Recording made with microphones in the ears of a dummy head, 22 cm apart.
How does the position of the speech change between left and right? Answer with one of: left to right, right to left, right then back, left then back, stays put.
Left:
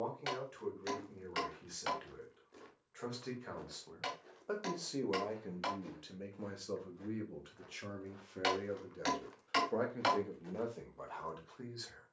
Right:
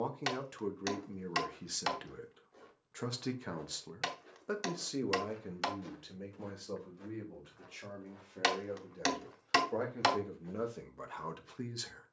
left then back.